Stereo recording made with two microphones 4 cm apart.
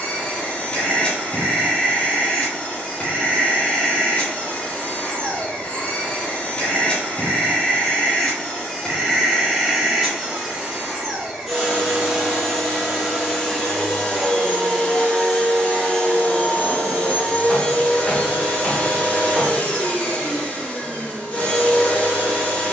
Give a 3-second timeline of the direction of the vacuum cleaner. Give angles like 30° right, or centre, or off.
30° left, 30° left, 20° left, centre, 10° left, 30° left, 30° left, 30° left.